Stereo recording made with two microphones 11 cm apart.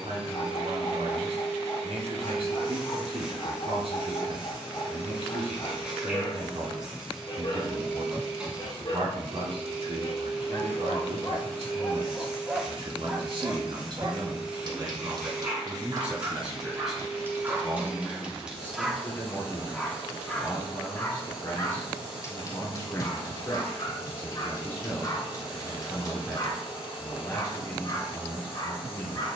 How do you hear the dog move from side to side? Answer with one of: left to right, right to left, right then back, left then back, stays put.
right then back.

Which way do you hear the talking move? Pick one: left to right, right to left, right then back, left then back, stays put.
right to left.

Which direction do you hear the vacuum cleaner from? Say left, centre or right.
centre.